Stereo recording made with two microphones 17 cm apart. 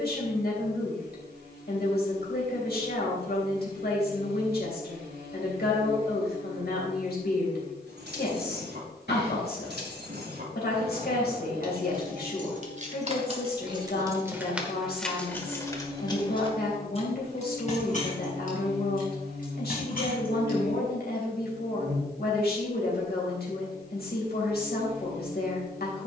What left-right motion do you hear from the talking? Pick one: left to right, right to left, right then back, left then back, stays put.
stays put.